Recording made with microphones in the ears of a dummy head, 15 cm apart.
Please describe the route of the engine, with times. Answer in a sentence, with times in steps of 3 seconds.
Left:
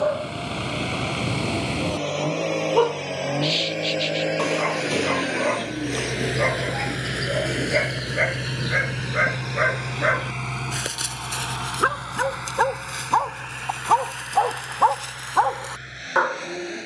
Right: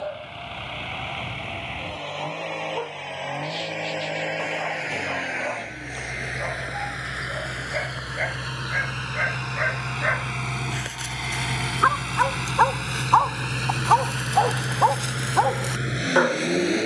You can hear the engine on the left from 0 s, in the centre from 9 s and on the right from 12 s.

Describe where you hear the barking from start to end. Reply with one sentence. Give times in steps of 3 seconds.
In this clip you hear the barking on the left from 0 s, in the centre from 12 s and on the right from 15 s.